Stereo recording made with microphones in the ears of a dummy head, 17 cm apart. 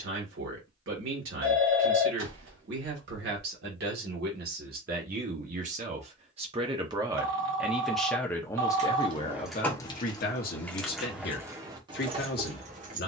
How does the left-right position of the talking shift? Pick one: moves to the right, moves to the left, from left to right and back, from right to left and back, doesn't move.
moves to the left.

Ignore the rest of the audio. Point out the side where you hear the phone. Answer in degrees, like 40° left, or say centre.
70° right.